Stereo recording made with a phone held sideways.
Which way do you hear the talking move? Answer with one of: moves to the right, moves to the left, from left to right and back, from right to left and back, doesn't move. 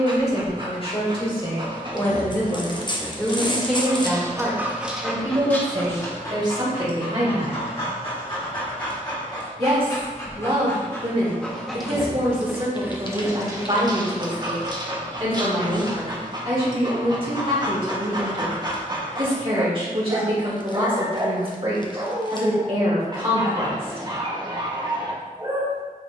moves to the right.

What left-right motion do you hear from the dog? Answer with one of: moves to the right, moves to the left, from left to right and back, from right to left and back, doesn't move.
from right to left and back.